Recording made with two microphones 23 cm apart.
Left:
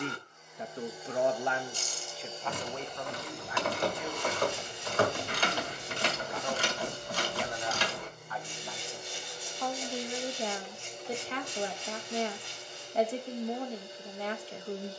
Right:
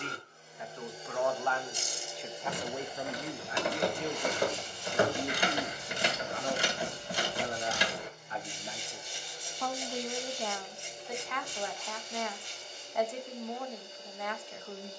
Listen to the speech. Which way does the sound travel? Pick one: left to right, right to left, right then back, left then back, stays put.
right then back.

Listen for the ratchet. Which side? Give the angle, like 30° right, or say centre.
10° right.